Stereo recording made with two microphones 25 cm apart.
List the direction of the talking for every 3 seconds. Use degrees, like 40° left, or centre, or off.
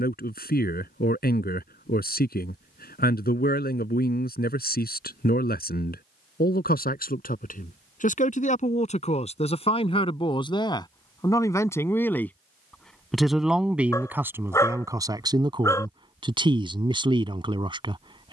40° left, 40° left, 30° left, 20° left, centre, 20° right.